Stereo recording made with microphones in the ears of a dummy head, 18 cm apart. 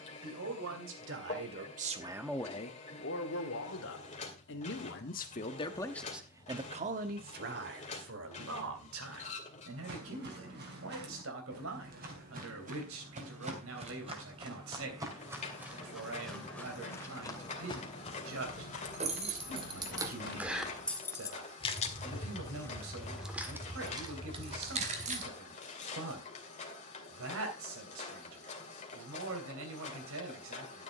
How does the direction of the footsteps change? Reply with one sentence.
You can hear the footsteps move from right to left.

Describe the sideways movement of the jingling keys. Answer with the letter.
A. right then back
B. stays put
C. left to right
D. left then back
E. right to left
D.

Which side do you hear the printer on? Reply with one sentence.
In this clip you hear the printer on the left.